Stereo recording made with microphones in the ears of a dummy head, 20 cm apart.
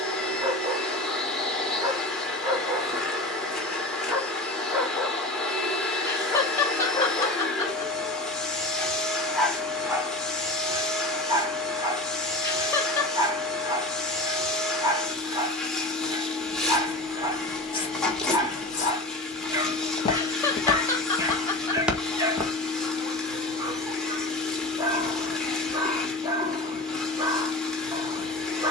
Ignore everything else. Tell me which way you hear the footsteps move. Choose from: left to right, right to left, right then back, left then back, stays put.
left then back.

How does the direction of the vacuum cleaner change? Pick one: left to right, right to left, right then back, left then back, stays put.
stays put.